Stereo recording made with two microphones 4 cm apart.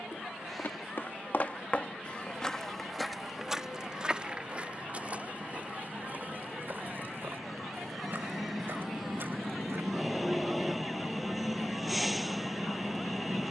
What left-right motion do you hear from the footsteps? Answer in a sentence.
You can hear the footsteps travel towards the right.